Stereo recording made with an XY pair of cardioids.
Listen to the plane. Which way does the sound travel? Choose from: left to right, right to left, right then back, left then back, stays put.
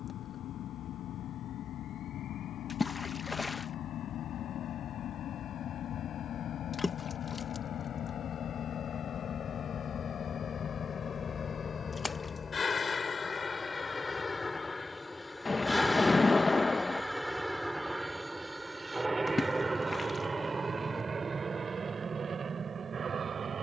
left to right.